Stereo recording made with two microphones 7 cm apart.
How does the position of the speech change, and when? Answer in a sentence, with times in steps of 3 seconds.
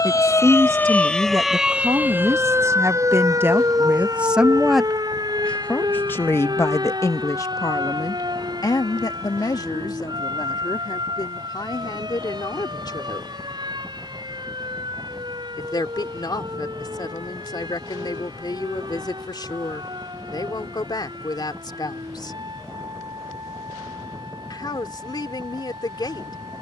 In this clip you hear the speech on the right from 0 s, in the centre from 3 s and on the left from 6 s.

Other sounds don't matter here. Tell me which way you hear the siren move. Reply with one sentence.
In this clip you hear the siren travel towards the right.